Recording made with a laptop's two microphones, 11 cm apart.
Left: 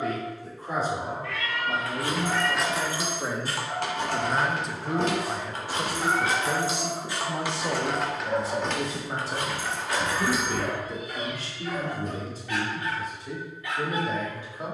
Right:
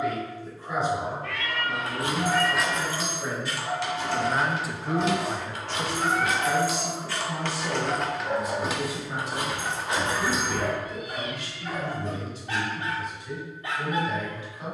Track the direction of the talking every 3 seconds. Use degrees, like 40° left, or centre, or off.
40° left, 10° left, 20° left, 40° left, 40° left.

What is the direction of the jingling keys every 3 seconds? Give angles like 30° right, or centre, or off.
10° right, 50° left, 10° left, 20° right, off.